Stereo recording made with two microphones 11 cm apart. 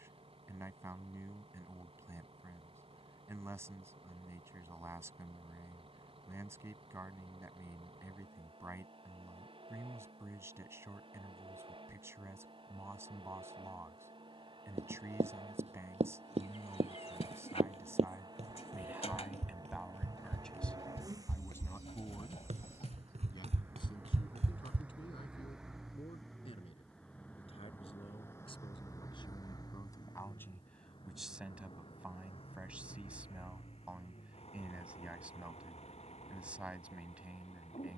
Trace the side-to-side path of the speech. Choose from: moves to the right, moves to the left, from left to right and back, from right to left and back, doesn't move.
from right to left and back.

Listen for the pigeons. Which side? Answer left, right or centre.
left.